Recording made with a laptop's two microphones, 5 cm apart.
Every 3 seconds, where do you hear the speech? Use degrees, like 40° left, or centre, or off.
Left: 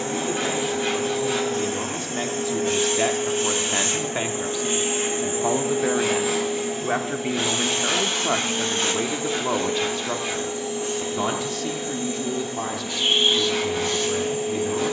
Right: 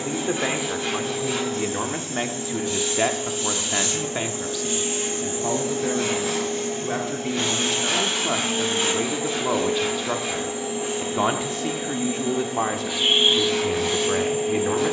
30° right, 10° left, 20° left, 10° right, 40° right.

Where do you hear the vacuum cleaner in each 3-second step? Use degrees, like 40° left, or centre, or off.
60° left, 30° left, centre, 10° right, 10° right.